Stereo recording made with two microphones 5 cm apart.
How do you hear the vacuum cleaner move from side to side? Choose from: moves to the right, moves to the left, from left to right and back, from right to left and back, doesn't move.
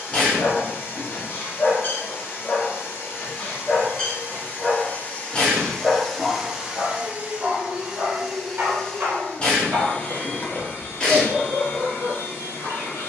from left to right and back.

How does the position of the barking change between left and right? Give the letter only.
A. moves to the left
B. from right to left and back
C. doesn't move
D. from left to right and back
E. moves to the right
E.